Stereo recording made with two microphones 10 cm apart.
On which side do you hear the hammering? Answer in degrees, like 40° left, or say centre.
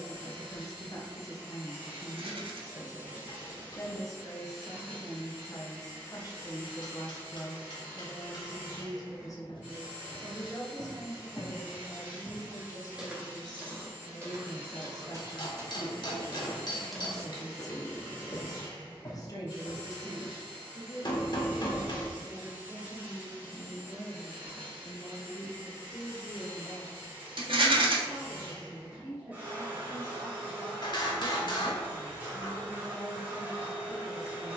50° left.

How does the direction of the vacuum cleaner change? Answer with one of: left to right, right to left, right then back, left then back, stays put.
stays put.